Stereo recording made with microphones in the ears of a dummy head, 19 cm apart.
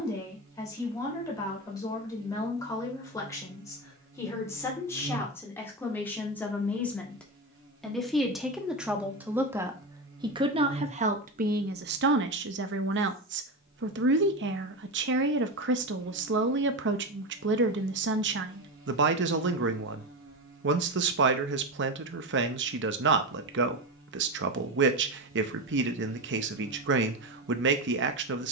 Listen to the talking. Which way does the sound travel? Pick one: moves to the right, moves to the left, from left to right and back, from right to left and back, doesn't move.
moves to the right.